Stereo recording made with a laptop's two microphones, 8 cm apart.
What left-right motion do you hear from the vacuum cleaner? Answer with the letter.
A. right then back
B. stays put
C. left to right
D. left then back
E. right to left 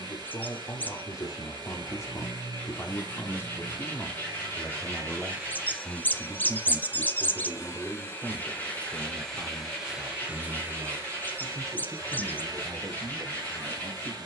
D.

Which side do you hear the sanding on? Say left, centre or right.
left.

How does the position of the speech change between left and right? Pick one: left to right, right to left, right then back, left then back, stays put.
left to right.